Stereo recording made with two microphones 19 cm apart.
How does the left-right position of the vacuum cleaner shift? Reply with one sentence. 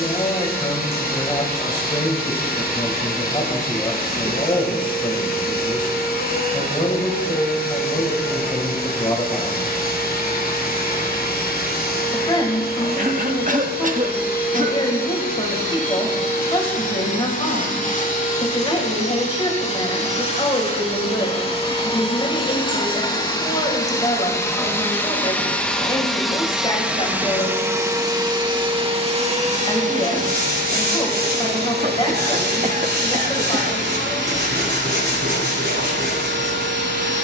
You can hear the vacuum cleaner move to the right.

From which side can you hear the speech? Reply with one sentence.
In this clip you hear the speech on the left.